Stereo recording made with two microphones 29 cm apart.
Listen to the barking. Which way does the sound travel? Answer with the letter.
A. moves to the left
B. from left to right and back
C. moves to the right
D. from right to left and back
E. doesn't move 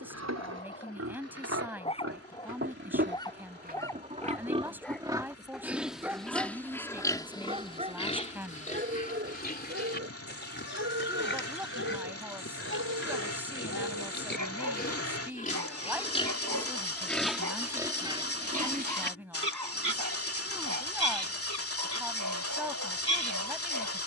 C.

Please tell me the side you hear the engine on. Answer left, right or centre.
left.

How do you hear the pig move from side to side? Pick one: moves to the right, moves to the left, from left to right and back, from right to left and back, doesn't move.
from right to left and back.